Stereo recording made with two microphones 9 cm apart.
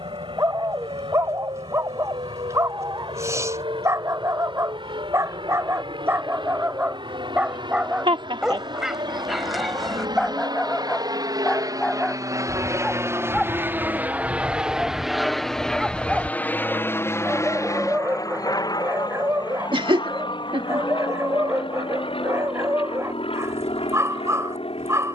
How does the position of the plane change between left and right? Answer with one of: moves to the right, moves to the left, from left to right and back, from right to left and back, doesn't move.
moves to the left.